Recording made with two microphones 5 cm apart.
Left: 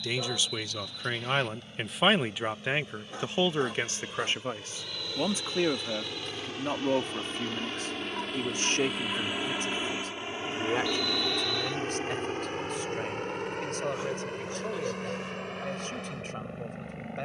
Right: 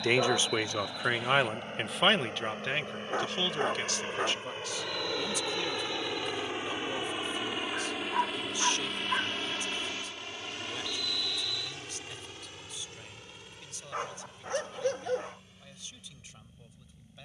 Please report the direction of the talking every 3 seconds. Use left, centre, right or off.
centre, left, left, left, left, left.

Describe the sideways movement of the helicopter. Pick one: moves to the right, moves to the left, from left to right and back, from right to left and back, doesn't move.
moves to the left.